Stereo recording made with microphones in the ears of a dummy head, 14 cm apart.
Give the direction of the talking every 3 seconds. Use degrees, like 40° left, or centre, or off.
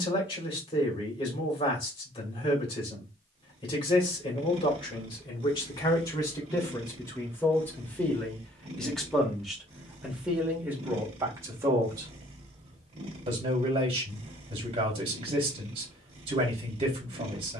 30° left, 30° left, 20° left, 10° right, 30° right, 30° right.